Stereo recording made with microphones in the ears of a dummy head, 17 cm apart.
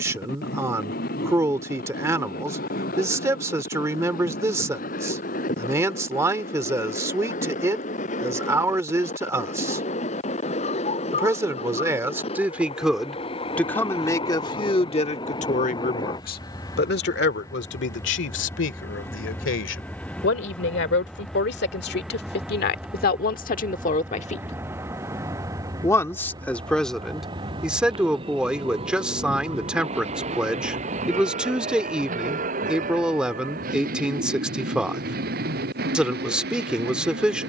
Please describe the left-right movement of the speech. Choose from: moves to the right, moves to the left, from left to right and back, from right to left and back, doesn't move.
from right to left and back.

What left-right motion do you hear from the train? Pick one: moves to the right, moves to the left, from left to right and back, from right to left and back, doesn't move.
moves to the right.